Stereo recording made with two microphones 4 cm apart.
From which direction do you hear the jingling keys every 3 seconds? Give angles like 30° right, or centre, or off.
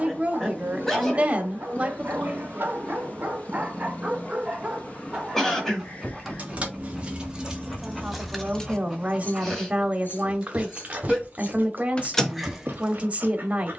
off, off, 10° right, 50° left, centre.